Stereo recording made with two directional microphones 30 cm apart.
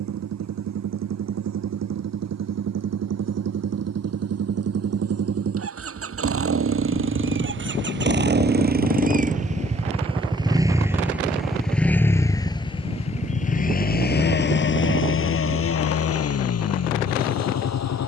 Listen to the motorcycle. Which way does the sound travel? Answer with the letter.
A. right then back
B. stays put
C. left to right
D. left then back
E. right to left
E.